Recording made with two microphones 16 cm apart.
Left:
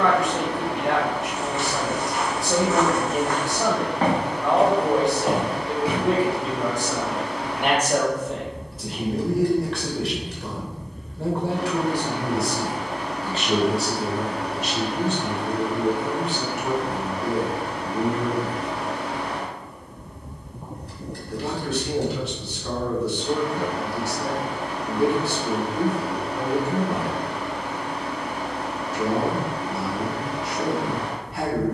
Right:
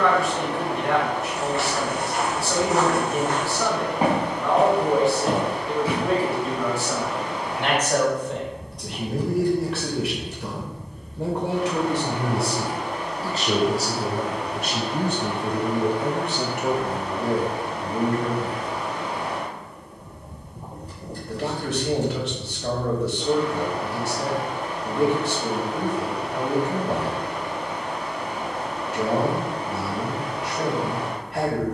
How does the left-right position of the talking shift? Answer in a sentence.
You can hear the talking travel towards the right.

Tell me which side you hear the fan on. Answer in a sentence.
In this clip you hear the fan on the left.